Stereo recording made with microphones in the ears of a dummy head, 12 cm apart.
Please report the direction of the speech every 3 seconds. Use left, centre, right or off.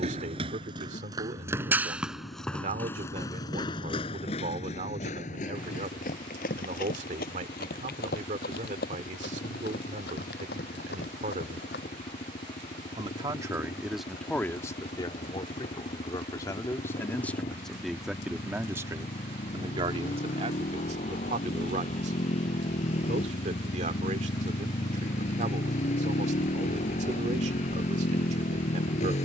right, right, right, right, centre, left, right, right, right, right.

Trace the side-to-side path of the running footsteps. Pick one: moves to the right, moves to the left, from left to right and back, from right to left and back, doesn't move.
moves to the left.